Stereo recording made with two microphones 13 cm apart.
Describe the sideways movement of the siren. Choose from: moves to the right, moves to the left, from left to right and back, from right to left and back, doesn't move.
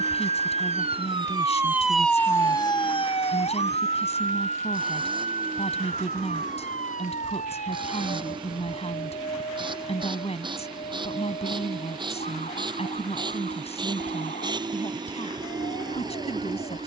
moves to the left.